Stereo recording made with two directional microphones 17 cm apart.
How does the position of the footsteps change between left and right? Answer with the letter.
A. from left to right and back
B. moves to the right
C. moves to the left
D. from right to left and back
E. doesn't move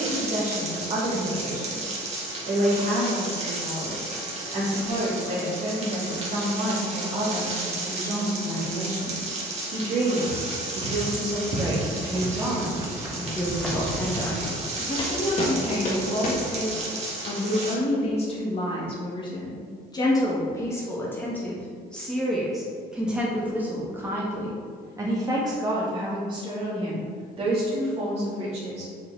C.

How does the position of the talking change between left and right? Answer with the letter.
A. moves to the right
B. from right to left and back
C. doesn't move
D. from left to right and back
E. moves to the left
B.